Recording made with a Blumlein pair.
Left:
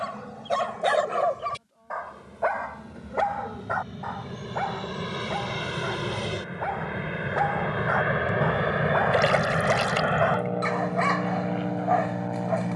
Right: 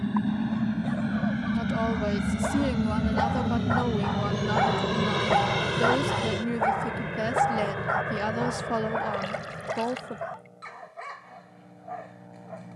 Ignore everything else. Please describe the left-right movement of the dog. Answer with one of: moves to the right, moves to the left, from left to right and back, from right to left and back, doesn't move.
from left to right and back.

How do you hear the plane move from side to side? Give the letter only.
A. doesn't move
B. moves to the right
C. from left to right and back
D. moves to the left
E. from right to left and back
D.